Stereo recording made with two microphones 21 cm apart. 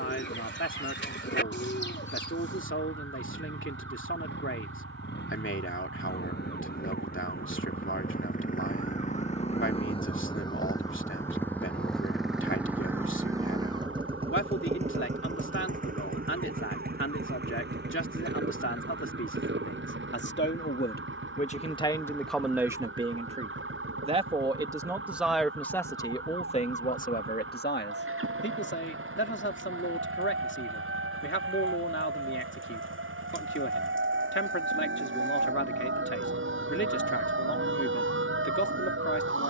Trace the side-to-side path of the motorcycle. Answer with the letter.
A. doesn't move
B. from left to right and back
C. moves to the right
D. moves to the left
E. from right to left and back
C.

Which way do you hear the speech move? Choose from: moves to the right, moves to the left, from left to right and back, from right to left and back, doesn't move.
from left to right and back.